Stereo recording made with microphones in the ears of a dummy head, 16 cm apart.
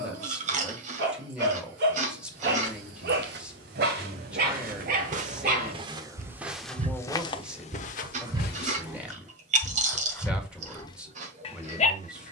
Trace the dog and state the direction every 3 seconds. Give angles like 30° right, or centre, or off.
60° right, 50° right, 30° right, 20° left.